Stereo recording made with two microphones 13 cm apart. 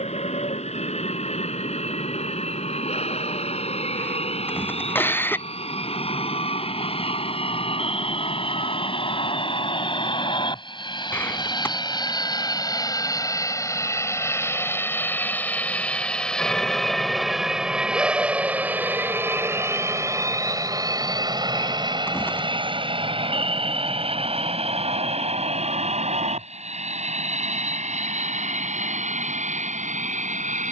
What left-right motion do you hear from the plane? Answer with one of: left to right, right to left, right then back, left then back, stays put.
left to right.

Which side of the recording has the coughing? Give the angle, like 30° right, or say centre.
20° left.